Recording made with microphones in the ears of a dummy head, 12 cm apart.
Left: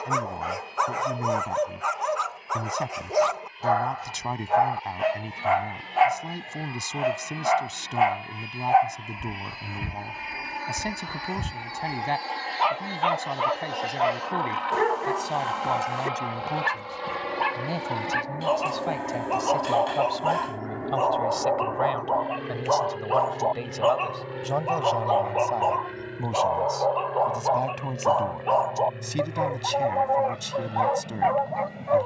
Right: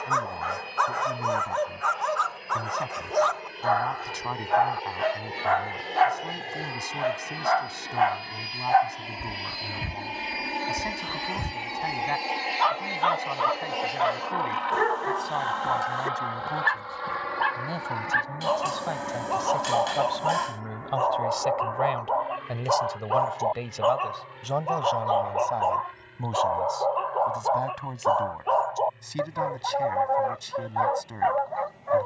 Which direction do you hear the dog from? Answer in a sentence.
In this clip you hear the dog in the centre.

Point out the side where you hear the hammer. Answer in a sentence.
In this clip you hear the hammer on the right.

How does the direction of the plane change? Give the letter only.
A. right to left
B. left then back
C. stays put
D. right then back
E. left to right
A.